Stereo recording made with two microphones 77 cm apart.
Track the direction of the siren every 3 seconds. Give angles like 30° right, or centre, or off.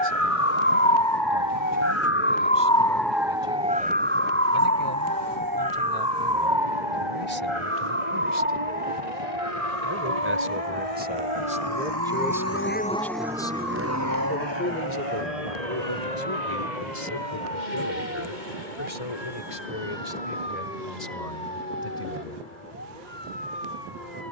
30° left, 20° right, 40° right, 50° right, 50° right, 50° right, 60° right, 60° right.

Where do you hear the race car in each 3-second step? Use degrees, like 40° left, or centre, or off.
80° left, 80° left, 70° left, 50° left, 10° right, 60° right, 70° right, 80° right.